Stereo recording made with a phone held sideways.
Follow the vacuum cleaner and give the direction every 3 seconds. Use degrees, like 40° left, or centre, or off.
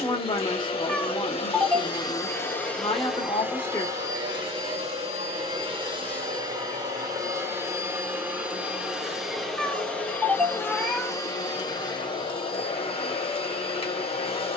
30° left, 30° right, 20° right, 10° left, 30° left.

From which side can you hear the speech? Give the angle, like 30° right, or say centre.
30° left.